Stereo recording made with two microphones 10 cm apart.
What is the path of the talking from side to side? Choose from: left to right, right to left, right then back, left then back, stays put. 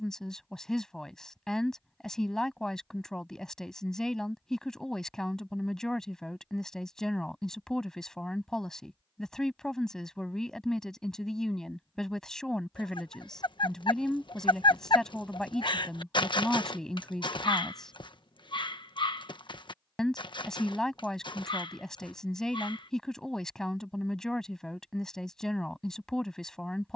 stays put.